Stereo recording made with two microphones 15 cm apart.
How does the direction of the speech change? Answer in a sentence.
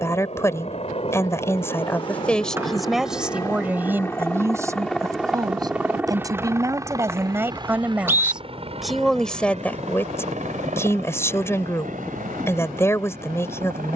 You can hear the speech move from left to right and back again.